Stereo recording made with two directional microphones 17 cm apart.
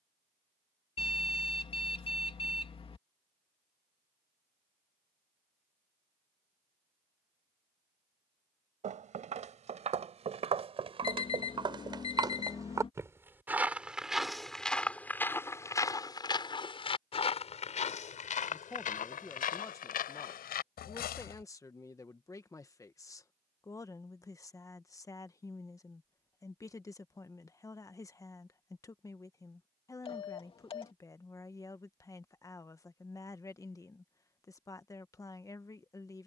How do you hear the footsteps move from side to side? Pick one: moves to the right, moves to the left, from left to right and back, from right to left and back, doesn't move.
moves to the left.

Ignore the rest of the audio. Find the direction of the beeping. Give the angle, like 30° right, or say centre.
30° left.